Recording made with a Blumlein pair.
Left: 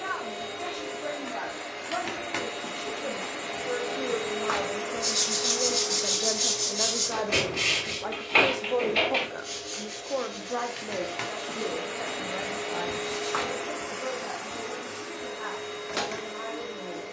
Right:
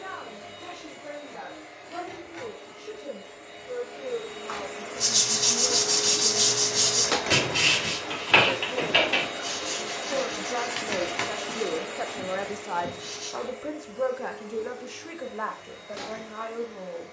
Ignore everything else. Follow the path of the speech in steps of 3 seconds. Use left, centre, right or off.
left, left, left, centre, right, right.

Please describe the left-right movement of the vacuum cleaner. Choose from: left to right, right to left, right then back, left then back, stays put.
right then back.